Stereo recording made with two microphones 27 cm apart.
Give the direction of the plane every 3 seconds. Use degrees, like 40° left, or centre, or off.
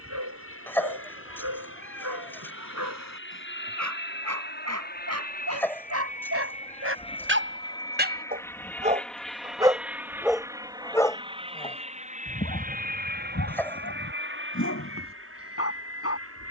50° left, 40° left, 20° left, 10° right, 30° right, 50° right.